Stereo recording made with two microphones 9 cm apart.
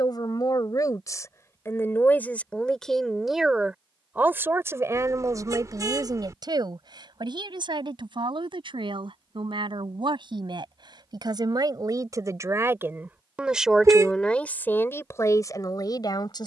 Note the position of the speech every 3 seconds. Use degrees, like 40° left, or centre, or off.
30° left, 20° right, 50° right, 50° right, 10° right, 40° left.